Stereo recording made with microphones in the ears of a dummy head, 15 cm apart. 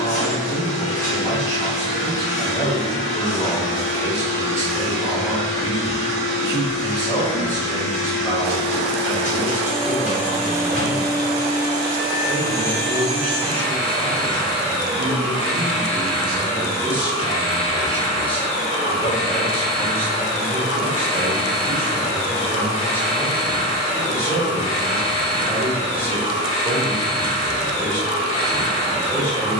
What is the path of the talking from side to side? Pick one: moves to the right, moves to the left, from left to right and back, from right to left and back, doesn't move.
from left to right and back.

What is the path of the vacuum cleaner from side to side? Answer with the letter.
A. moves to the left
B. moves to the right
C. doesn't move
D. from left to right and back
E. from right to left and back
D.